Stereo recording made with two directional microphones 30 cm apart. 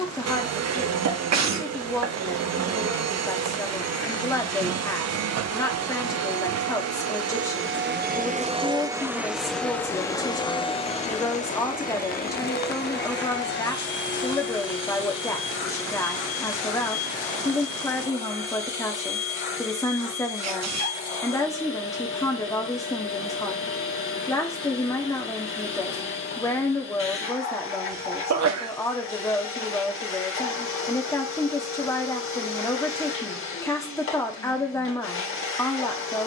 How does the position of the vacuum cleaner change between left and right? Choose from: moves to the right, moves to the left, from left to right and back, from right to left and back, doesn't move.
moves to the left.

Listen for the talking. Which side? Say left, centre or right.
centre.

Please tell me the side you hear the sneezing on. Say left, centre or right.
right.